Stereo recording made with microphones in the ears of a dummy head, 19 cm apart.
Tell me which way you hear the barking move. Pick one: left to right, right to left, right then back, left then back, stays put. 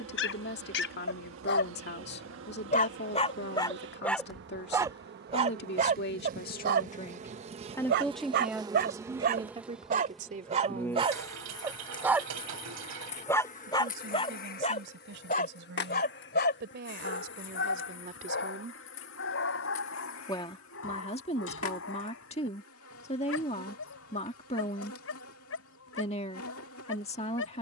right then back.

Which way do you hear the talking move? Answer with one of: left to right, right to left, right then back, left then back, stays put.
right then back.